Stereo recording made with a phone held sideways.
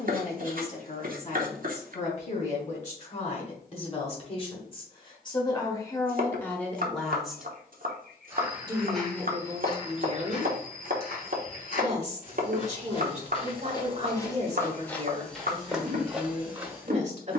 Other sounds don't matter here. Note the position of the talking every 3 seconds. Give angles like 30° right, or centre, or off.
50° left, 30° left, centre, 40° right, 40° right, 40° right.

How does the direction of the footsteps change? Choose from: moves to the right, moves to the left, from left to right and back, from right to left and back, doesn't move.
from right to left and back.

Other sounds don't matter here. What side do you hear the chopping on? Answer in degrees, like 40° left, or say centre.
60° right.